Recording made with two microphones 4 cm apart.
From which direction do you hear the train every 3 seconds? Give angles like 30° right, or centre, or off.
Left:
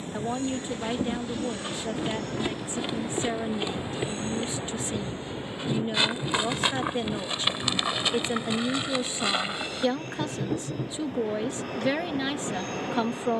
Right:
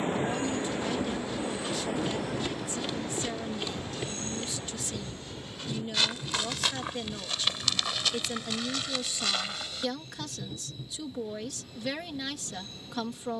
20° right, 20° left, 40° left, 50° left, 60° left.